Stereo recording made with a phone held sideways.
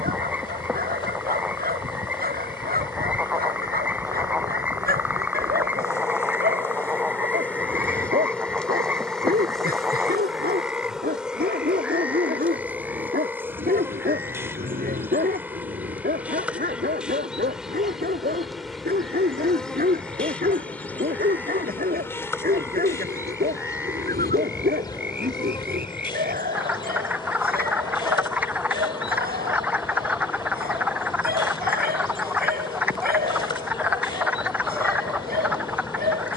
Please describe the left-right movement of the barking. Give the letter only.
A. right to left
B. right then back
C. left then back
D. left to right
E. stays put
E.